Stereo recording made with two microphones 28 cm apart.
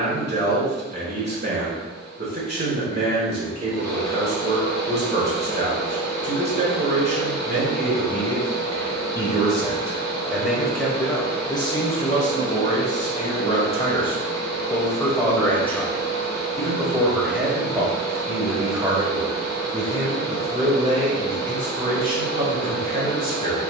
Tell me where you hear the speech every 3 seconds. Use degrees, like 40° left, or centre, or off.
40° right, 40° right, 30° right, centre, 20° left, centre, 20° right, 30° right.